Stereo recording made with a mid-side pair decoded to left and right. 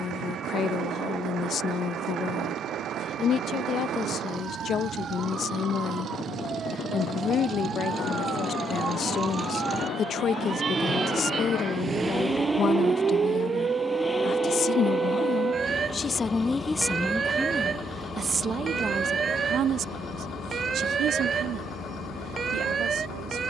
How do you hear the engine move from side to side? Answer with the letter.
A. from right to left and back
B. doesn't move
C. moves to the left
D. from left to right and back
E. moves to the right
C.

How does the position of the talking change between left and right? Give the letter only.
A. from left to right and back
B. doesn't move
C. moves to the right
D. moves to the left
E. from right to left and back
C.